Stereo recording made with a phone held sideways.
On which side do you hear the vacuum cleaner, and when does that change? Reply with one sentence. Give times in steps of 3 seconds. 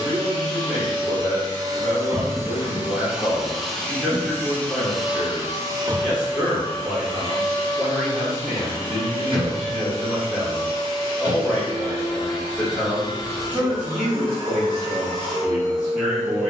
You can hear the vacuum cleaner on the right from 0 s, in the centre from 3 s and on the right from 6 s.